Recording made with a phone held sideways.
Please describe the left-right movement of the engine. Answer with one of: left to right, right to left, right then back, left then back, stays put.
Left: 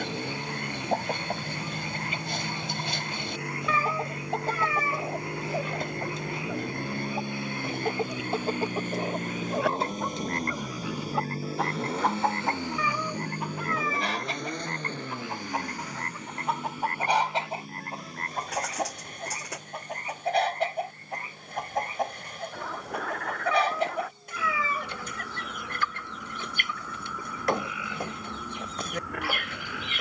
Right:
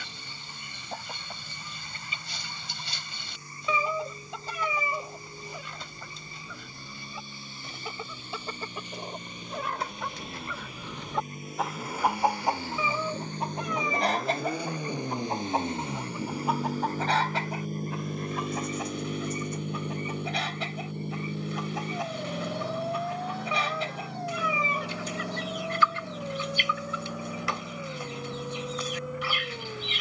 left to right.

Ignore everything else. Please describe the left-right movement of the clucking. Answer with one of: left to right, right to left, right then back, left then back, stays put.
right then back.